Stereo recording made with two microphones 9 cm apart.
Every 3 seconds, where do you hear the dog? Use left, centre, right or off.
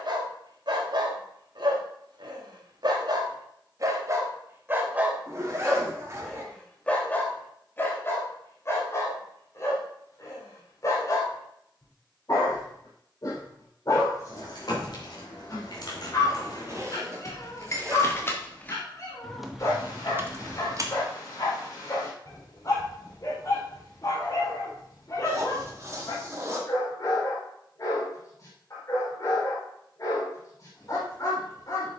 right, right, left, left, left, left, left, left, left, left, left.